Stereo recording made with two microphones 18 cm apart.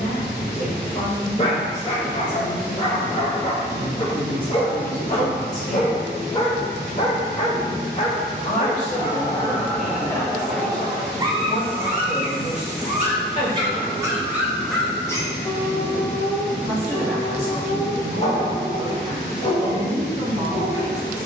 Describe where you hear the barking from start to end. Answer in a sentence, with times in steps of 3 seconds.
You can hear the barking on the left from 0 s, in the centre from 9 s, on the right from 12 s and on the left from 15 s.